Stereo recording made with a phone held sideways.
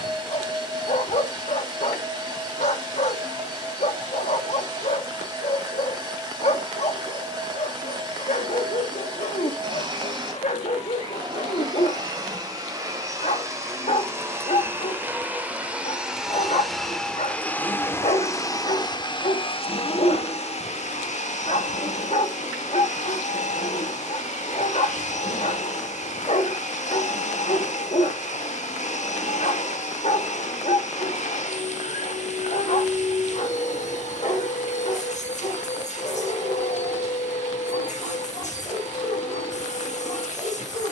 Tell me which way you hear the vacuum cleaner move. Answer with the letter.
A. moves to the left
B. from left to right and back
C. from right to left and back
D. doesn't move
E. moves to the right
A.